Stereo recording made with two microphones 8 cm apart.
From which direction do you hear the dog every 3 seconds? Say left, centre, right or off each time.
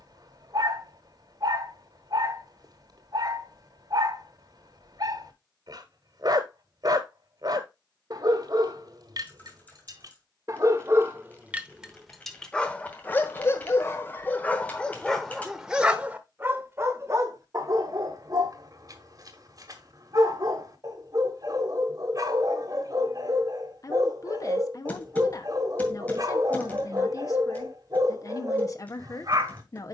right, right, right, right, left, right, right, right, right, right.